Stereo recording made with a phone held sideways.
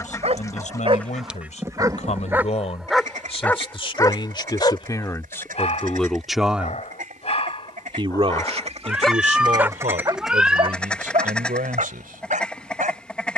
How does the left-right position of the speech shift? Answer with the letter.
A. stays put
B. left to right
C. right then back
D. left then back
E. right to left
B.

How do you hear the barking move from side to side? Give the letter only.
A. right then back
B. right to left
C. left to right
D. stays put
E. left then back
E.